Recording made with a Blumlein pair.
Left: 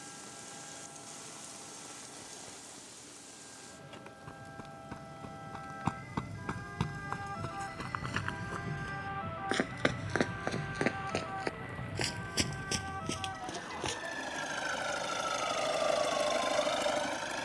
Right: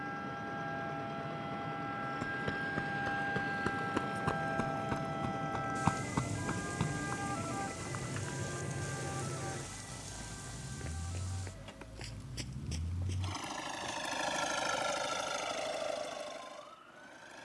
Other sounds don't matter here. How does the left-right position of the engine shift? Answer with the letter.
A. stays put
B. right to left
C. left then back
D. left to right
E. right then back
B.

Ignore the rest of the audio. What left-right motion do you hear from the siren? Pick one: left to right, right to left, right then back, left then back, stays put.
right to left.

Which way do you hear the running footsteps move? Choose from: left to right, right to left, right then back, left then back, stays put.
right to left.